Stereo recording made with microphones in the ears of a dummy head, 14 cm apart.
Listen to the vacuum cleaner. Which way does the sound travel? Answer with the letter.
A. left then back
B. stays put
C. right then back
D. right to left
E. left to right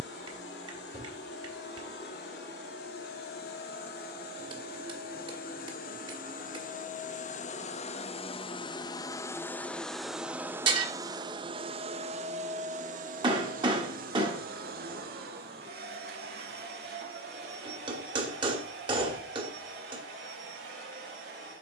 E.